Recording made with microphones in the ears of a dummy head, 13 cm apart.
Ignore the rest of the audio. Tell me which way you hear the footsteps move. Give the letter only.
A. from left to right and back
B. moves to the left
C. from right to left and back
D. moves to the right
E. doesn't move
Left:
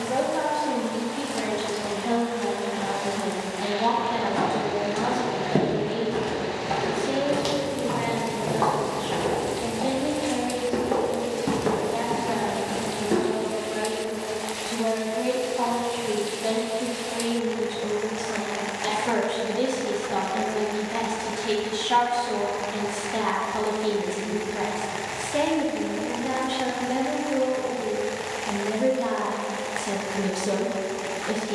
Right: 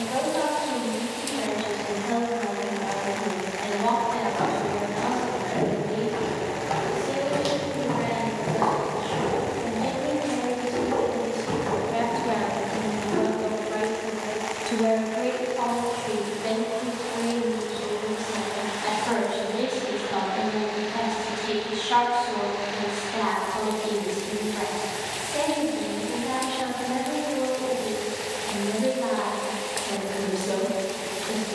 A.